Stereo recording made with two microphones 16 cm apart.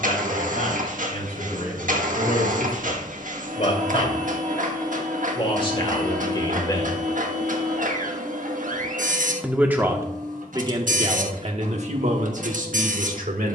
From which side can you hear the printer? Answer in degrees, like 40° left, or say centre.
60° right.